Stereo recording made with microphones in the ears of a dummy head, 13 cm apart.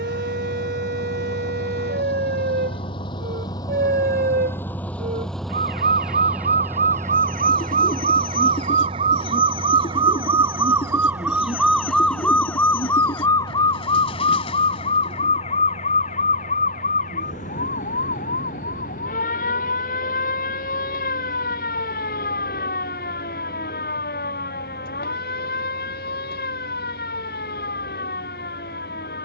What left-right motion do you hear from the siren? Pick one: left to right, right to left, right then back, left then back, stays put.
right to left.